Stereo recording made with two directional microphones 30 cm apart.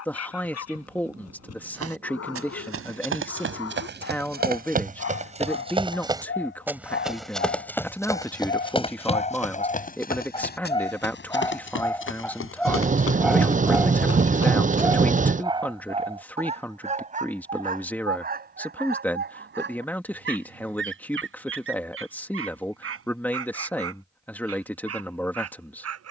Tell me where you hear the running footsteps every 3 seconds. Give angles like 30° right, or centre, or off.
50° right, 30° right, centre, 30° left, 50° left, off, off, off, off.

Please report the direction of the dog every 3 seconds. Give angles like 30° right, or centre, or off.
60° left, 50° left, 40° left, 20° left, centre, 20° right, 30° right, 50° right, 50° right.